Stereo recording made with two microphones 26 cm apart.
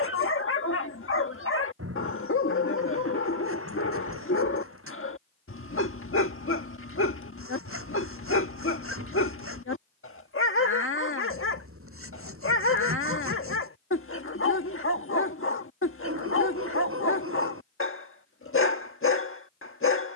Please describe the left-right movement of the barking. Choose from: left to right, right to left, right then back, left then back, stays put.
stays put.